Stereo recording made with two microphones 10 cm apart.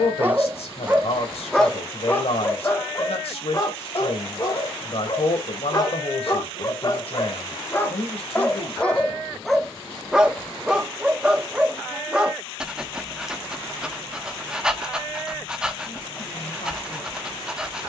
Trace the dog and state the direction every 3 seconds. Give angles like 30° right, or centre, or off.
centre, 40° left, 20° left, centre, 10° right, 10° right.